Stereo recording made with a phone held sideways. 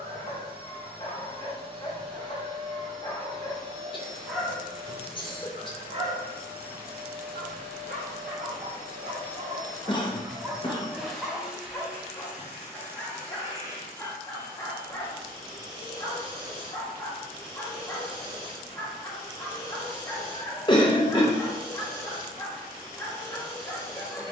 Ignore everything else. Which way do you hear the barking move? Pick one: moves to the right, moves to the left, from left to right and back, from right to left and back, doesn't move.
from left to right and back.